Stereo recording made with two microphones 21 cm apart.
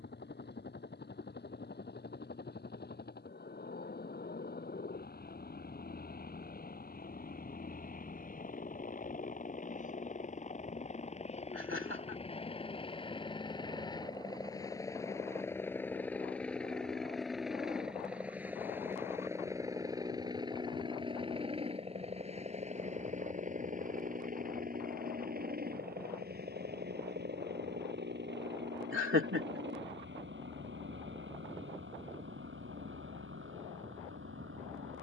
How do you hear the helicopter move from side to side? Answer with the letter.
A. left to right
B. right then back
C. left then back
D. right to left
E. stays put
A.